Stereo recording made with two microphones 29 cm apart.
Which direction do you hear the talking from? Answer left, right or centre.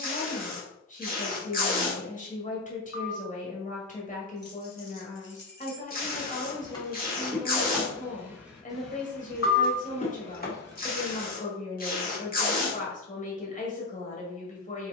left.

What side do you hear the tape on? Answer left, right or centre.
left.